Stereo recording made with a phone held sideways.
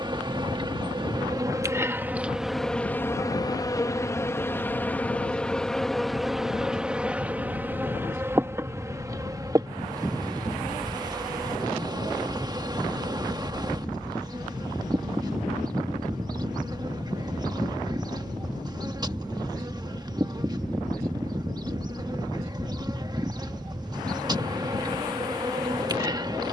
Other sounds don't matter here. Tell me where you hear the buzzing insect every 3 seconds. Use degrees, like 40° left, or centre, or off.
20° right, 10° left, 10° right, 30° right, 30° right, 30° right, 30° right, 30° right, 30° right.